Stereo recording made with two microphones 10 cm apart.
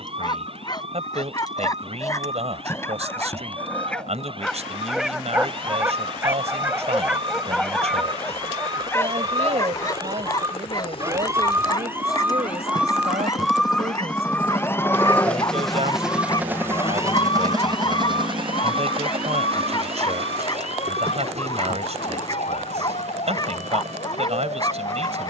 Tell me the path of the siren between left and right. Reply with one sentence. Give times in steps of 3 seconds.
You can hear the siren on the right from 0 s, in the centre from 12 s and on the left from 15 s.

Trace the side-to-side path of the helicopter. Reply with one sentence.
You can hear the helicopter travel towards the right.